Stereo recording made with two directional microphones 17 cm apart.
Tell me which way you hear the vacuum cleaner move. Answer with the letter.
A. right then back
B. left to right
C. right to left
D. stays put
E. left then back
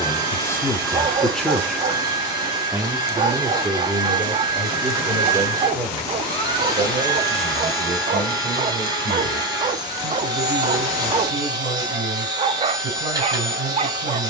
D.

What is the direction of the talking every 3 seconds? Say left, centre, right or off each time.
centre, right, right, right, right.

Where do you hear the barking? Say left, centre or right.
right.